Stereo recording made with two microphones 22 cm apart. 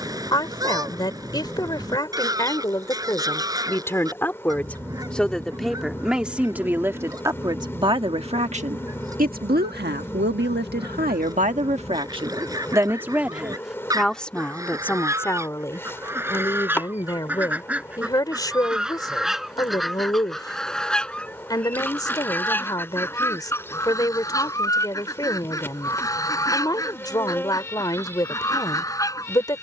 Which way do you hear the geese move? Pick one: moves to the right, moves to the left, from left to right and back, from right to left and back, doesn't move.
moves to the left.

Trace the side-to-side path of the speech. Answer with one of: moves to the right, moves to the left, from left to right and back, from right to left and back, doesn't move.
from left to right and back.